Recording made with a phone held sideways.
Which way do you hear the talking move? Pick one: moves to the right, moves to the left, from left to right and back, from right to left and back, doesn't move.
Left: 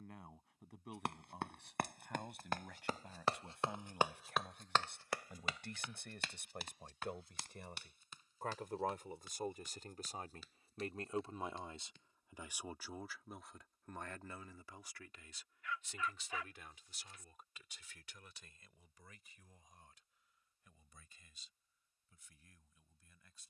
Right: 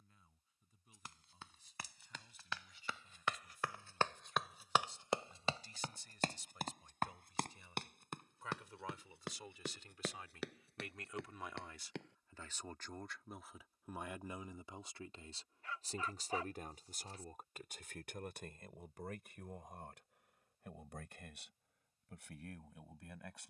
moves to the right.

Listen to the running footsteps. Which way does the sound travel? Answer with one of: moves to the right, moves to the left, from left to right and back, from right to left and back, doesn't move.
moves to the right.